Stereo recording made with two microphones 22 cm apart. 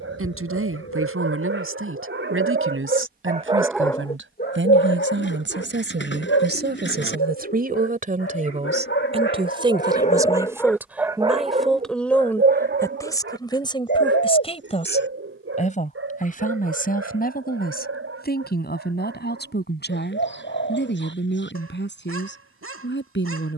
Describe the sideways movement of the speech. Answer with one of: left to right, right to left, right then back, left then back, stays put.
right to left.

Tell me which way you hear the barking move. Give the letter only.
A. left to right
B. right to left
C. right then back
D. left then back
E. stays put
D.